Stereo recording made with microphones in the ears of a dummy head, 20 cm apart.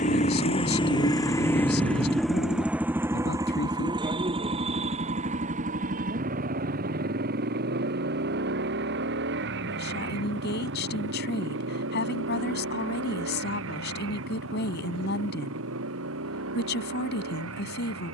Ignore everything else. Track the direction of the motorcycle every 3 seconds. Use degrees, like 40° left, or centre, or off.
10° left, 20° right, 40° right, 50° right, 60° right, 60° right.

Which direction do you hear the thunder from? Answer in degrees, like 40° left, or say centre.
30° right.